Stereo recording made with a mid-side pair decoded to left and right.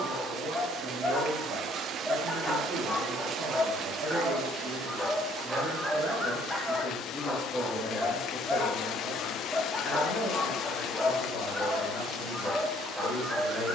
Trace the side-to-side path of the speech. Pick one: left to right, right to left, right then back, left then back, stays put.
right to left.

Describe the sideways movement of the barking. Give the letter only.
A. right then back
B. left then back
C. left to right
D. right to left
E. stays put
E.